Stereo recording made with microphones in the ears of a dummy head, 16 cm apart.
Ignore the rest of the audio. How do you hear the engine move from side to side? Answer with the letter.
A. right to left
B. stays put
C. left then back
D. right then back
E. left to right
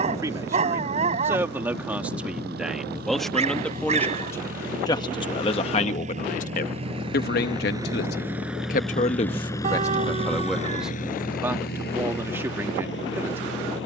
A.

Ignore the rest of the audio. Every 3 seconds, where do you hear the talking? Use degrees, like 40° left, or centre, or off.
10° right, 20° left, 50° left, 10° left, 10° right.